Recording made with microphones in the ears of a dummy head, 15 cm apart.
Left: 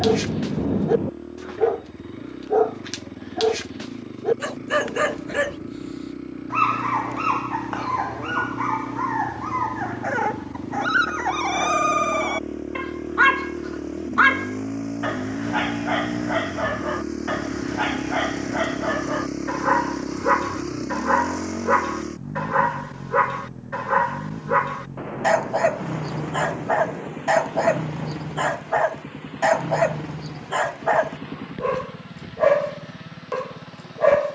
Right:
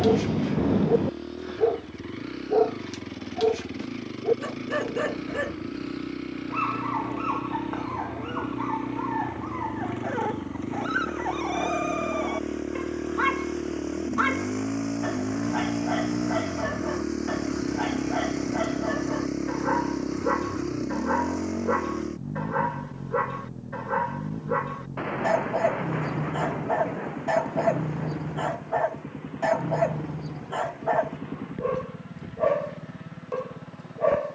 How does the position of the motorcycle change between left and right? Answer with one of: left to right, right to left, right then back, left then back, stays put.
right to left.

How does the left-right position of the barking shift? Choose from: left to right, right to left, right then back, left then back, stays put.
stays put.